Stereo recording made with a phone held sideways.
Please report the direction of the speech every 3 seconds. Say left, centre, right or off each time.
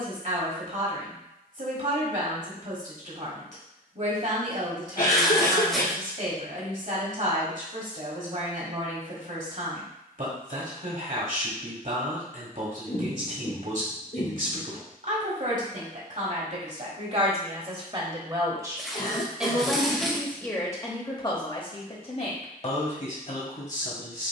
right, right, right, right, right, right, centre, left.